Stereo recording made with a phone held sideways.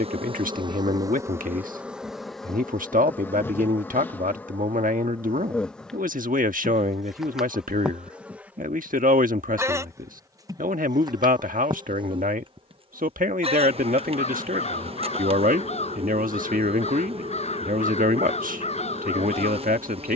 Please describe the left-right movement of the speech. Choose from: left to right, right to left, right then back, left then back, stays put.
stays put.